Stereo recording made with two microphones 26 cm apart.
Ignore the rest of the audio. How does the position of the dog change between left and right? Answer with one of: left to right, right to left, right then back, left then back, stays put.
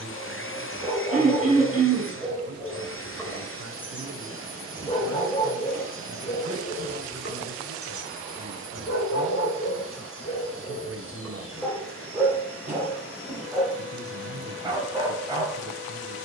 left then back.